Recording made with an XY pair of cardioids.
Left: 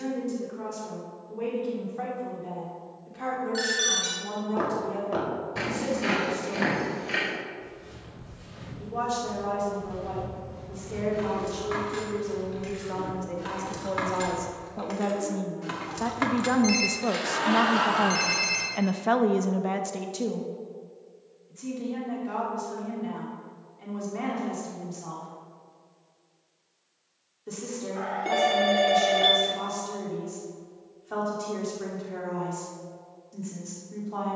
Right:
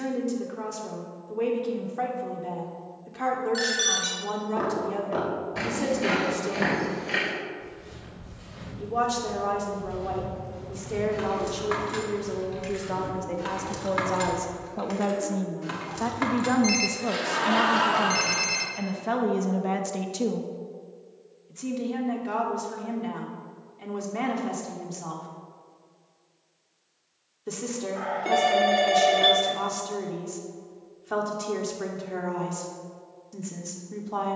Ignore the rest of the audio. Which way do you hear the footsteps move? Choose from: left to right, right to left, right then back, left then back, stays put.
left to right.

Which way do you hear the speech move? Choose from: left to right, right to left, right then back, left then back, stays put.
left then back.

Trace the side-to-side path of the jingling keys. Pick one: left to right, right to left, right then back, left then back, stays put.
right to left.